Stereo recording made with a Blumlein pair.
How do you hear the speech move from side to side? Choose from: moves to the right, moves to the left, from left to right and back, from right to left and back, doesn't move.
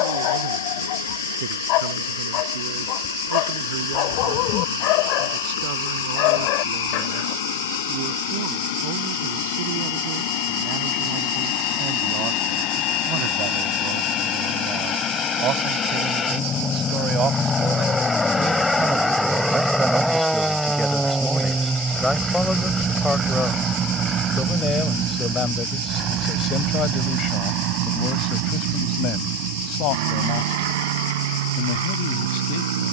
moves to the left.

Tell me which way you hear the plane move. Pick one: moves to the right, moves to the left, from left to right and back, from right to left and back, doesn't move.
moves to the right.